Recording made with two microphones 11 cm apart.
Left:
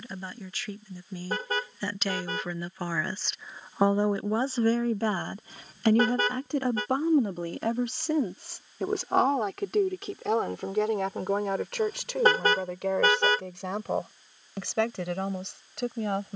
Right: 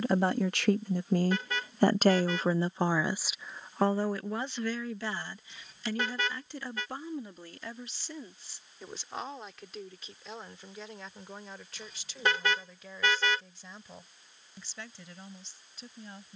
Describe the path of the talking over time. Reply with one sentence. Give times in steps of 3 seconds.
You can hear the talking on the right from 0 s and on the left from 3 s.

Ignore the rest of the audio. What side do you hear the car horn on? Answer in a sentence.
You can hear the car horn on the left.